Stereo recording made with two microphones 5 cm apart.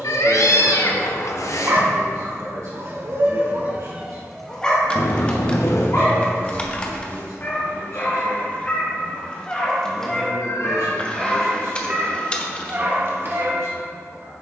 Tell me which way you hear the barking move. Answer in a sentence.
In this clip you hear the barking go left and come back.